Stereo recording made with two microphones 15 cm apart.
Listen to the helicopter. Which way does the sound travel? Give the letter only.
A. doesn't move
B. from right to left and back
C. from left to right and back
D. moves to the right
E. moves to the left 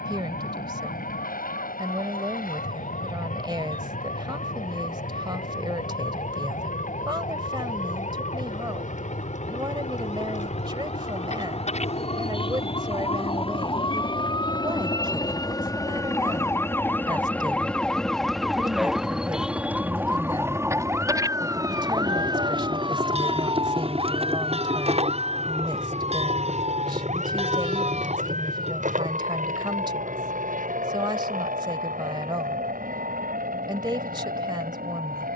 D.